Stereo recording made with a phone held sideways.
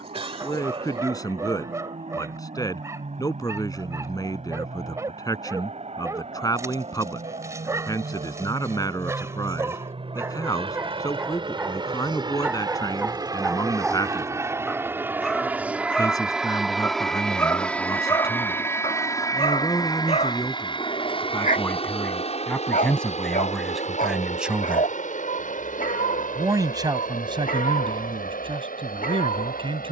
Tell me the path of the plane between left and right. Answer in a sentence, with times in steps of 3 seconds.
In this clip you hear the plane on the right from 0 s, in the centre from 15 s and on the left from 18 s.